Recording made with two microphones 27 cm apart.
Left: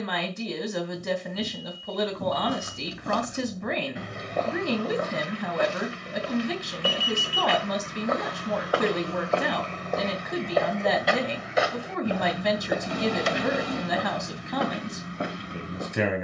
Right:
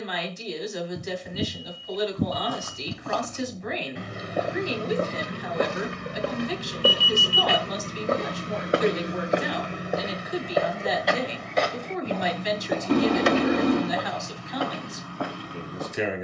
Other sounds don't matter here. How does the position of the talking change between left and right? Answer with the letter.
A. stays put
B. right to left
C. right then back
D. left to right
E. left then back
A.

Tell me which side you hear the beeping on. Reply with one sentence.
In this clip you hear the beeping on the right.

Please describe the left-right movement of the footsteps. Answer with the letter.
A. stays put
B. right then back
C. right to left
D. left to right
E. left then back
B.